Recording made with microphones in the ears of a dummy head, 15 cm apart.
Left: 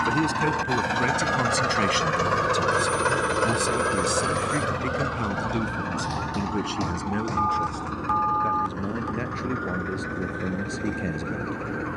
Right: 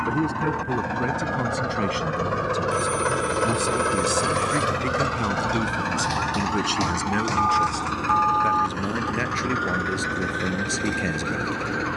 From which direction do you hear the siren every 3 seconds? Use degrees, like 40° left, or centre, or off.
70° left, 20° left, 40° right, 60° right.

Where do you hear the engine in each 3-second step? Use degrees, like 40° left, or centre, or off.
50° left, 20° right, 50° right, 60° right.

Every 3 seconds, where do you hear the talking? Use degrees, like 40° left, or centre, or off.
50° left, 10° right, 40° right, 50° right.